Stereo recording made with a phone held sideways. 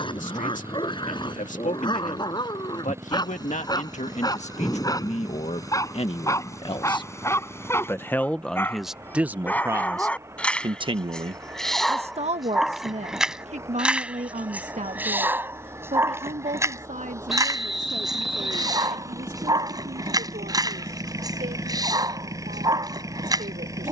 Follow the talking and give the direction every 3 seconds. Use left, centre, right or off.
left, left, left, right, right, right, right, right.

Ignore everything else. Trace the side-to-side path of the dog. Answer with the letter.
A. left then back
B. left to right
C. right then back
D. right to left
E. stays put
B.